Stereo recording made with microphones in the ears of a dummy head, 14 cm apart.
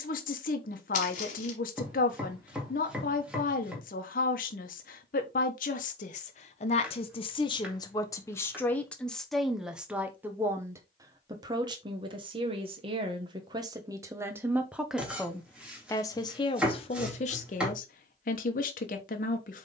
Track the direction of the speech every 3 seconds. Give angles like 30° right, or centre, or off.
60° left, 60° left, 30° left, 10° right, 20° right, 30° left, 50° left.